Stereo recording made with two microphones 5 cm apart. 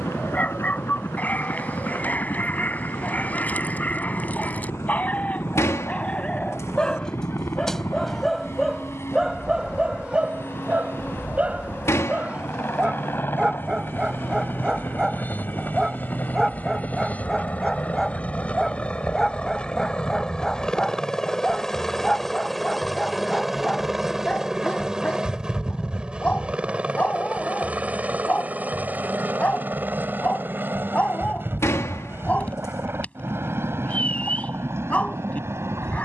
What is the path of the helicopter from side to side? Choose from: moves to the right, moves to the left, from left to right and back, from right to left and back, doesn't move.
moves to the right.